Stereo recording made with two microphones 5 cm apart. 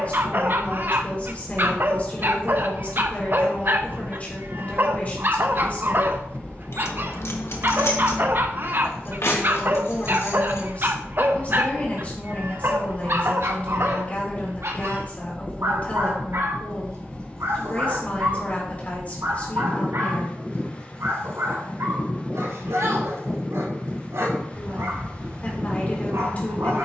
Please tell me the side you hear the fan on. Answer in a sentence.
In this clip you hear the fan on the left.